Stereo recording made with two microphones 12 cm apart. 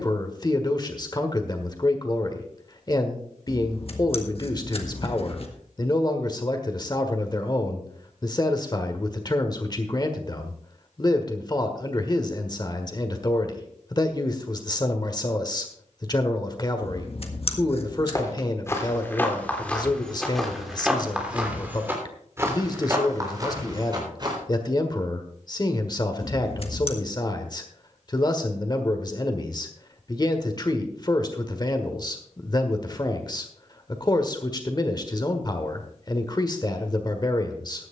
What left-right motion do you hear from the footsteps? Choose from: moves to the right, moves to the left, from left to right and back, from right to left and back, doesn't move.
moves to the right.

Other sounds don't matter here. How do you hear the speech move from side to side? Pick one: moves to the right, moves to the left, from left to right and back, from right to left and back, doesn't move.
doesn't move.